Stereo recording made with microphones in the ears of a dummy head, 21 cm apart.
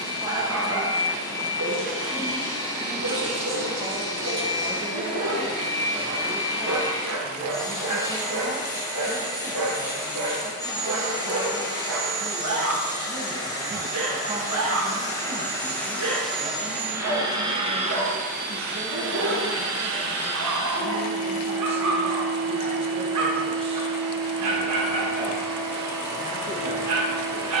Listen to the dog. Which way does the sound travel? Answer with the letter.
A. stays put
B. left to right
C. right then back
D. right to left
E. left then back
A.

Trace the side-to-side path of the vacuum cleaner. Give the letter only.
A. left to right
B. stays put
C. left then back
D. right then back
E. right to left
A.